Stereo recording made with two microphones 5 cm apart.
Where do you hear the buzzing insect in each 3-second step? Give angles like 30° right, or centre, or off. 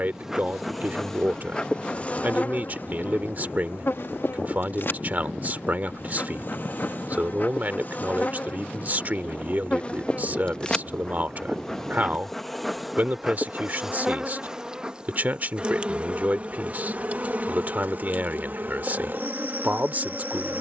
10° left, 50° left, 40° left, 20° left, 10° right, 30° right, 50° right.